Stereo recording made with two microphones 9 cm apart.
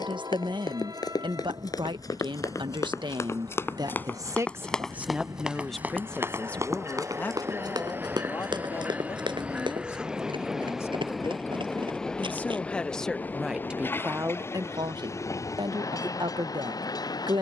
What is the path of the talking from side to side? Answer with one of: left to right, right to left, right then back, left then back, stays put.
left then back.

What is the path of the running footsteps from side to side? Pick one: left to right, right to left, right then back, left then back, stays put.
left to right.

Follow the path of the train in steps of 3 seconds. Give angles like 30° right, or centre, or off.
50° right, 40° right, 30° right, 10° right, 20° left, 40° left.